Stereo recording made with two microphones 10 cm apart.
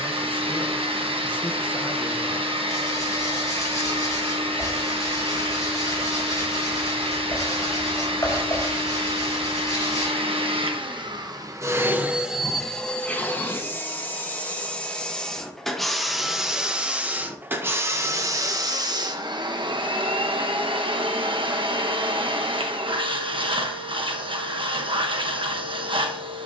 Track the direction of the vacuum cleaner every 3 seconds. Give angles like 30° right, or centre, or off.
70° right, 70° right, 70° right, 60° right, 10° left, 10° right, 50° right, 60° right, 60° right.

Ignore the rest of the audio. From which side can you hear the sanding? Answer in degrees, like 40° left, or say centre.
30° left.